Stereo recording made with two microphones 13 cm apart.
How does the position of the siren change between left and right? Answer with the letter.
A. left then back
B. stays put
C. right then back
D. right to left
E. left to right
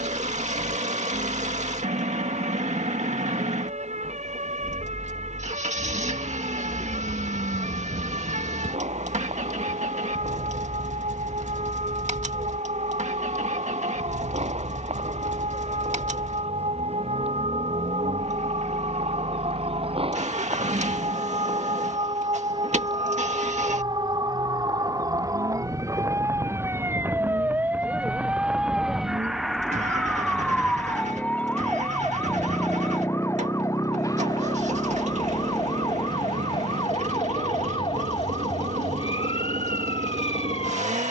D.